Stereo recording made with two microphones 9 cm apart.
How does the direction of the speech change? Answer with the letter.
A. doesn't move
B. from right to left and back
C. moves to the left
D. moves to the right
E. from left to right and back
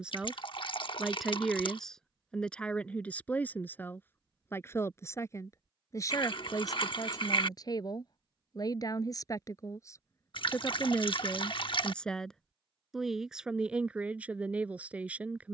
B.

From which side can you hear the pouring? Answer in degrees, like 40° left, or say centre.
60° left.